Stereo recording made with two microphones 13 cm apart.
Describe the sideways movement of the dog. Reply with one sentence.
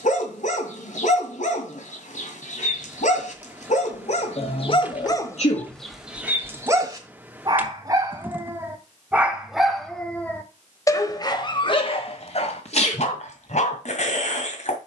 In this clip you hear the dog move from left to right and back again.